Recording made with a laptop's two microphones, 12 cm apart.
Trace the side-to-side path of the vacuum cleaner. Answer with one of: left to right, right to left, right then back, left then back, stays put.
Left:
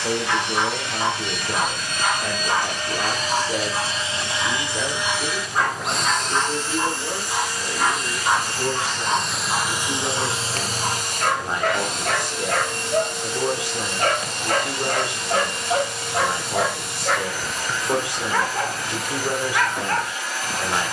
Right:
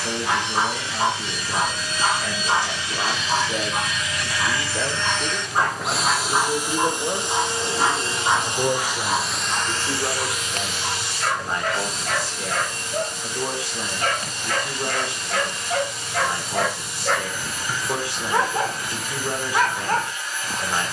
right then back.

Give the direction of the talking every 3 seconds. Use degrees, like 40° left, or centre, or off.
20° left, centre, 30° right, 10° right, 20° left, 20° left, 20° left.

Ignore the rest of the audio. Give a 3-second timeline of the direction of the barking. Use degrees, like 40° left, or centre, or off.
30° right, 30° right, 10° right, 50° left, 50° left, 10° left, 20° right.